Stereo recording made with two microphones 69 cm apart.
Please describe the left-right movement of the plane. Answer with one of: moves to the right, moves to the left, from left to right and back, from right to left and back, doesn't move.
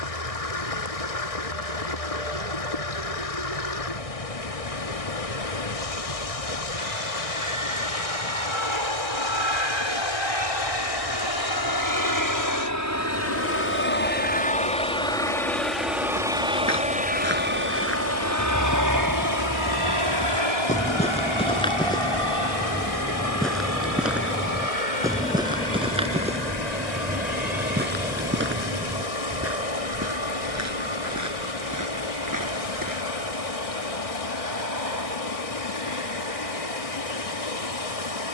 moves to the right.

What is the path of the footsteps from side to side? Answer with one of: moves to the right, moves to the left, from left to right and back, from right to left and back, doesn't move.
moves to the right.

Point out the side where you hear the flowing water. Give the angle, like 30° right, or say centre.
60° left.